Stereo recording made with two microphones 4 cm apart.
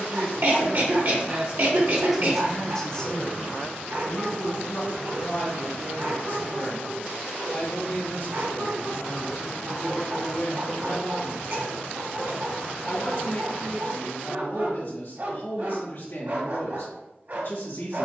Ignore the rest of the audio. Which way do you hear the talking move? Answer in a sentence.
In this clip you hear the talking move to the left.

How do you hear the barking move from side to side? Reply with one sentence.
You can hear the barking stay in one place.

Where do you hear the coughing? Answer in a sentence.
You can hear the coughing on the right.